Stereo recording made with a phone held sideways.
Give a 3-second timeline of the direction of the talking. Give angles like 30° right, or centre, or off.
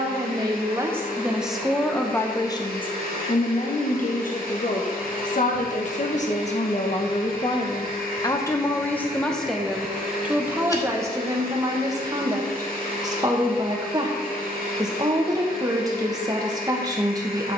centre, 60° left, 30° left, 10° right, 20° right, 20° right.